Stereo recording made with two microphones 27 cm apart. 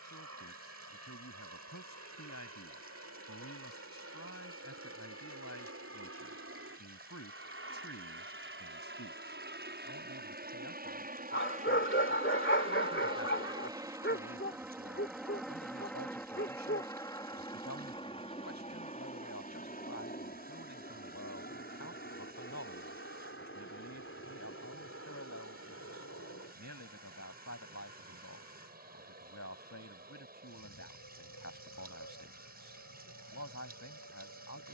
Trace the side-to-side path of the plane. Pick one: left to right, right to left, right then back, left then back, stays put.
right to left.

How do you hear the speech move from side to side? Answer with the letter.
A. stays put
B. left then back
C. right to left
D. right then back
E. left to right
A.